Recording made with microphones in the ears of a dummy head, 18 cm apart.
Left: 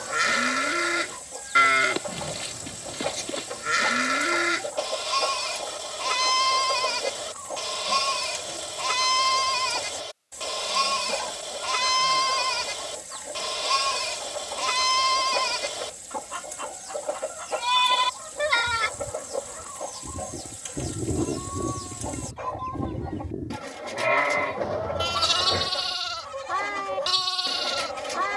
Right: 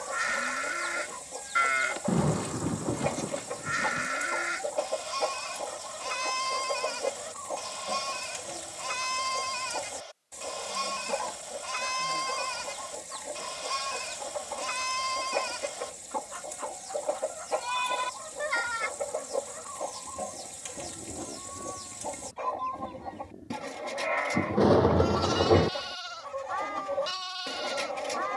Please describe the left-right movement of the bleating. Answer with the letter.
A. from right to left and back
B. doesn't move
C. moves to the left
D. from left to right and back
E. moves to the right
B.